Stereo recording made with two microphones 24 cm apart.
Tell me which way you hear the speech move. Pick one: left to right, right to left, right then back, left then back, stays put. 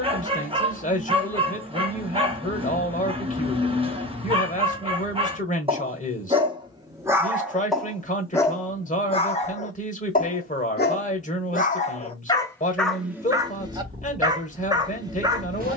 stays put.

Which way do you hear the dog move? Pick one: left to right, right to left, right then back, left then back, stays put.
left then back.